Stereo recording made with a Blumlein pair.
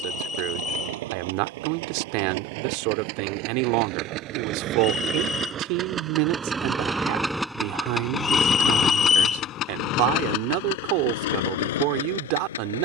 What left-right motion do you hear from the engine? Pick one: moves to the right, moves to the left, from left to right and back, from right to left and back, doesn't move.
moves to the left.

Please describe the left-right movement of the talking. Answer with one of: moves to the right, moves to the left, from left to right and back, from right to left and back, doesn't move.
doesn't move.